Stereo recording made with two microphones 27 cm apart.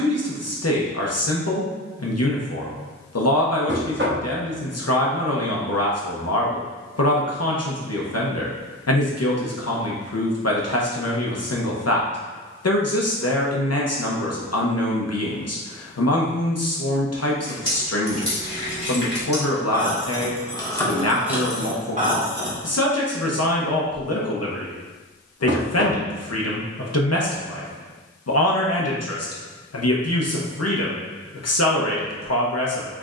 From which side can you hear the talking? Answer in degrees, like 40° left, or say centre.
60° left.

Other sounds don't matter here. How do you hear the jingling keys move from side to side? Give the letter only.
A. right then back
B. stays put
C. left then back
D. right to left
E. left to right
E.